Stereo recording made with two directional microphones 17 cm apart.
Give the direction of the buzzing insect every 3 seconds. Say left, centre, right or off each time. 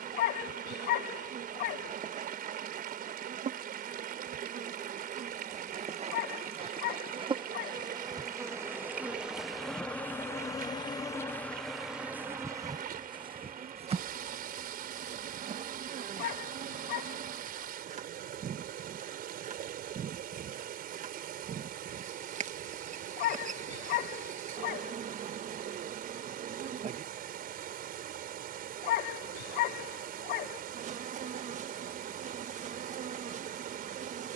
right, right, right, centre, right, right, right, right, right, right, right, right.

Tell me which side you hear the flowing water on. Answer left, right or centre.
right.